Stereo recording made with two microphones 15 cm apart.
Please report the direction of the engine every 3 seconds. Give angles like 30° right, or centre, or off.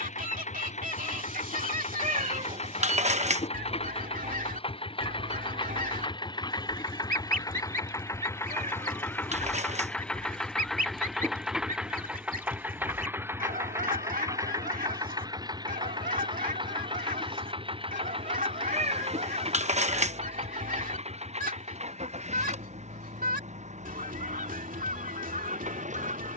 50° left, 40° left, 20° left, centre, 20° right, 30° right, 40° right, 50° right, 60° right.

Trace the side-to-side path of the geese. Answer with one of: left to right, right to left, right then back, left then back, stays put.
stays put.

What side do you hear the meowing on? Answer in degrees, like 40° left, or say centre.
50° right.